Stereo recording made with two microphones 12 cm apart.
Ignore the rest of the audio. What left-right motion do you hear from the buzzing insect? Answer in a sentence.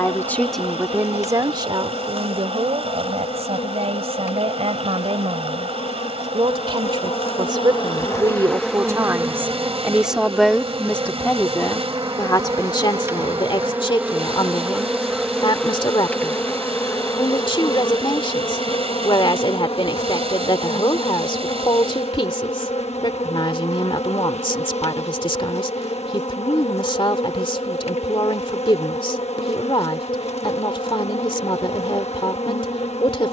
In this clip you hear the buzzing insect go right and come back.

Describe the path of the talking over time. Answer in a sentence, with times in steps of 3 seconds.
You can hear the talking on the right from 0 s, in the centre from 9 s and on the left from 12 s.